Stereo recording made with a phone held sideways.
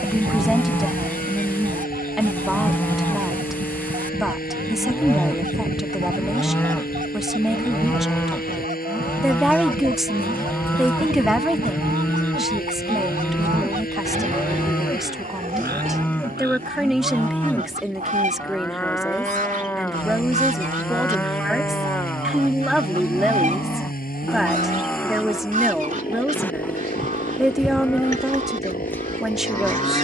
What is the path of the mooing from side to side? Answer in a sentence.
In this clip you hear the mooing stay put.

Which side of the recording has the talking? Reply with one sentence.
In this clip you hear the talking in the centre.